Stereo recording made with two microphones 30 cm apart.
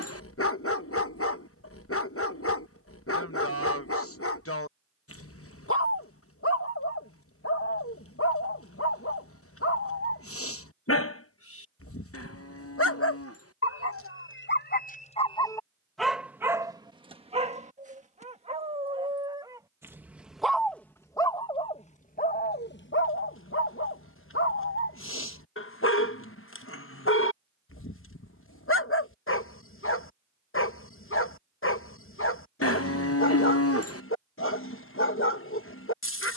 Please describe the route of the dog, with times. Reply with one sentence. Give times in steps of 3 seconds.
You can hear the dog on the left from 0 s, in the centre from 15 s and on the left from 21 s.